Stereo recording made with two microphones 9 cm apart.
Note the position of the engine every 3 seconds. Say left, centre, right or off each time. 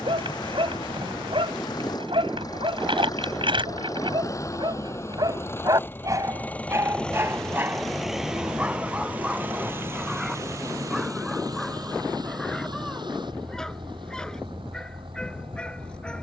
left, left, centre, right, right, right.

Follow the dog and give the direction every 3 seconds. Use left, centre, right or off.
right, right, right, centre, centre, centre.